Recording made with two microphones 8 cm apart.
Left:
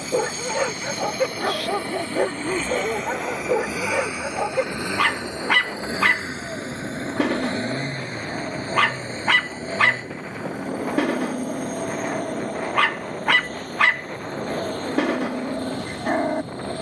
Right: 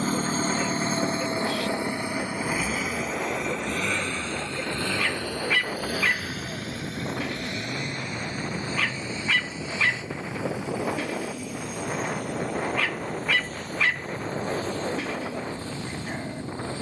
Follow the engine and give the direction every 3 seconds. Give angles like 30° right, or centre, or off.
30° right, 10° left, 30° left, 40° left, 50° left, 50° left.